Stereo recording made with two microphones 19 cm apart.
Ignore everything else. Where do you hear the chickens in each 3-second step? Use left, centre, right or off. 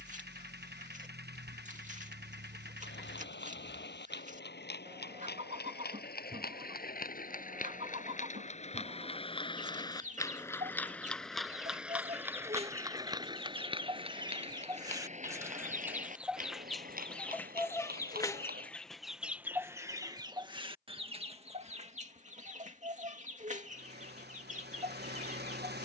right, right, right, right, right, centre, centre, right, right.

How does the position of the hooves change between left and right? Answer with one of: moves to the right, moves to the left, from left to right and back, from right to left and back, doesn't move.
moves to the right.